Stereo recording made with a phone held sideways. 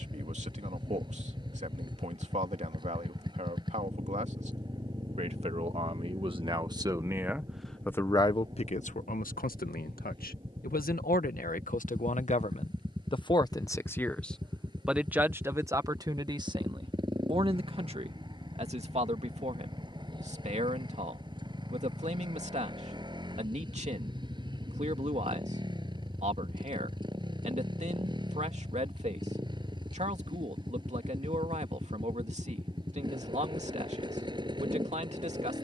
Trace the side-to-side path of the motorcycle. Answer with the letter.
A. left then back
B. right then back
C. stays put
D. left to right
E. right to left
C.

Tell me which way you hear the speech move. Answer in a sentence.
In this clip you hear the speech move from right to left and back again.